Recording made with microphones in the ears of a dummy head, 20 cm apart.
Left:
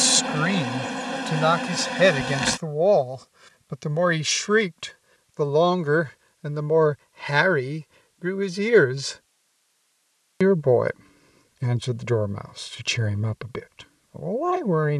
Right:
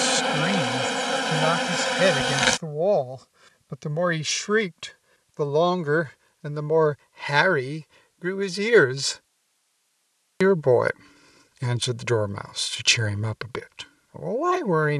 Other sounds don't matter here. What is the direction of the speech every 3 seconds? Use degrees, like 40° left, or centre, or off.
10° left, centre, 20° right, 40° right, 40° right.